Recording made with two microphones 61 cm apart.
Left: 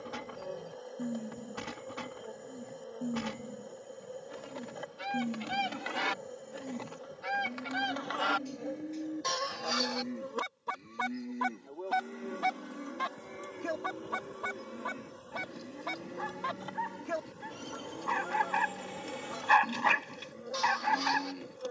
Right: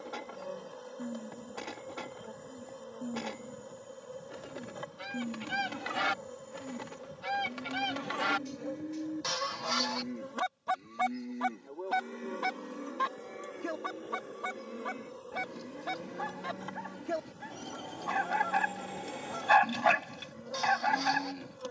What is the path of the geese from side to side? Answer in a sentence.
In this clip you hear the geese move from left to right and back again.